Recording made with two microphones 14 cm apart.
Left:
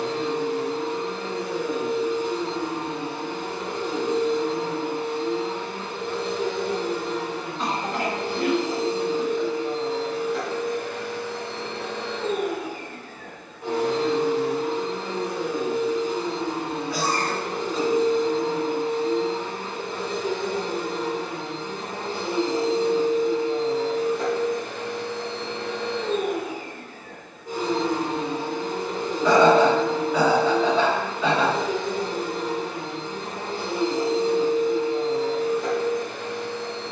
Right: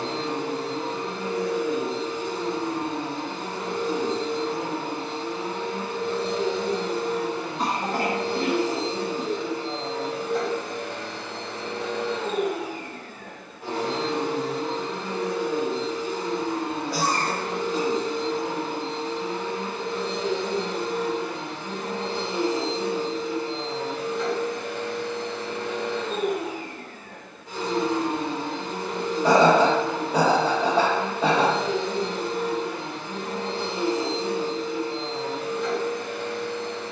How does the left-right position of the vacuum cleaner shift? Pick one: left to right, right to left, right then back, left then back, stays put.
right to left.